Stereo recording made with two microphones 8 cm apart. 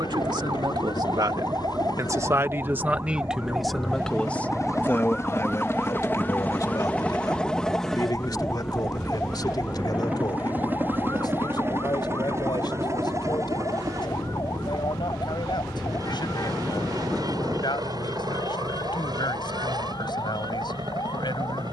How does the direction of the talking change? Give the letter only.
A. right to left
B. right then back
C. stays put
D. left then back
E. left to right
A.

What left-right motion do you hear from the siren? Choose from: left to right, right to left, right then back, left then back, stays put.
right to left.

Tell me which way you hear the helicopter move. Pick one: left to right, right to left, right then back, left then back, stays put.
left to right.